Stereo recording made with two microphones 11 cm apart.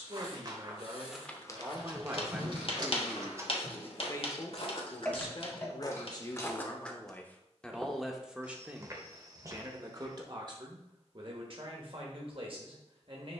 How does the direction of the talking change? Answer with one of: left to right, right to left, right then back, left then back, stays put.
left then back.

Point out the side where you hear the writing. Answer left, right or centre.
left.